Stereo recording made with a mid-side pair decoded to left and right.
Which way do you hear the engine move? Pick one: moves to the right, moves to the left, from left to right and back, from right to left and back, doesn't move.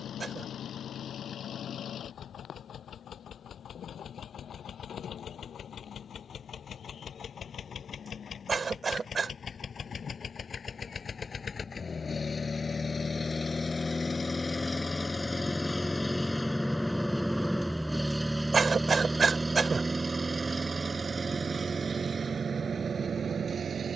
moves to the right.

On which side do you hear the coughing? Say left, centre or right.
right.